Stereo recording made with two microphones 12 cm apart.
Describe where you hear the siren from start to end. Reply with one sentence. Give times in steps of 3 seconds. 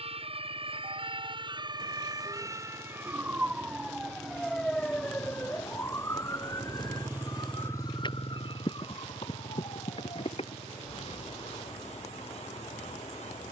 In this clip you hear the siren on the right from 0 s, in the centre from 3 s and on the left from 6 s.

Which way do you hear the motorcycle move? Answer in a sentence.
In this clip you hear the motorcycle travel towards the left.